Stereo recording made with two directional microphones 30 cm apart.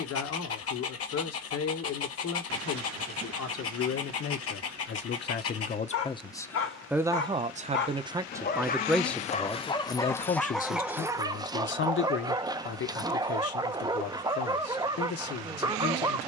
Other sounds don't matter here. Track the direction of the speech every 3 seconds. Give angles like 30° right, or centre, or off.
60° left, 40° left, 10° right, 30° left, 50° left, 50° left.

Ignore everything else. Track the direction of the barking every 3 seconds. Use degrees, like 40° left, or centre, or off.
50° left, 50° left, 40° left, centre, 10° right, 10° right.